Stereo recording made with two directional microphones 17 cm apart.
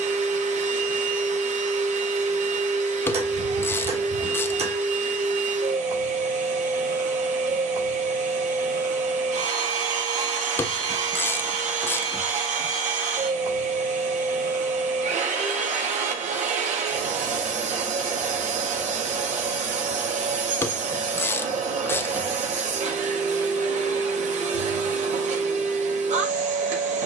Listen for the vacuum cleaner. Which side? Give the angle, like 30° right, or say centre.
50° right.